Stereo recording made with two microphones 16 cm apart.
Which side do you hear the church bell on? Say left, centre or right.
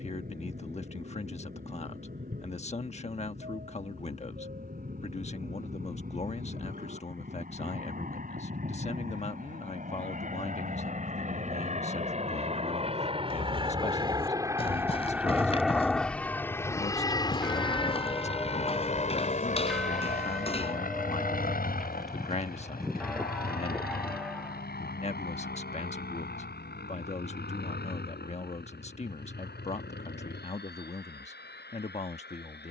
centre.